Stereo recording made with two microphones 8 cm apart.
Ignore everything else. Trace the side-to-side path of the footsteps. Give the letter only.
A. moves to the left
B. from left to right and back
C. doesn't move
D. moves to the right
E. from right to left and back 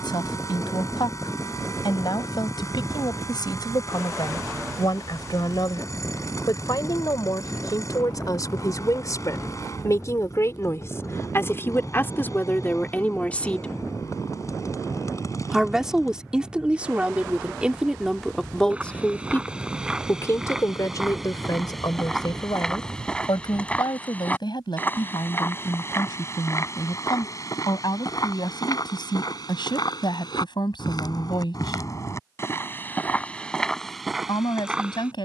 E.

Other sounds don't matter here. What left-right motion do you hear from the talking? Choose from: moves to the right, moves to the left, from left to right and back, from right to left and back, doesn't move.
from left to right and back.